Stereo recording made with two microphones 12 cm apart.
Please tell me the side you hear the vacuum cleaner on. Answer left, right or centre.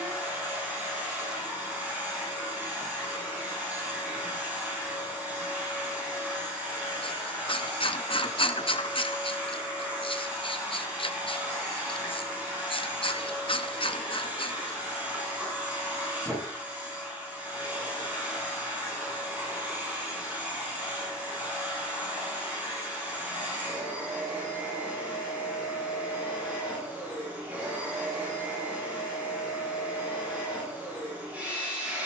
centre.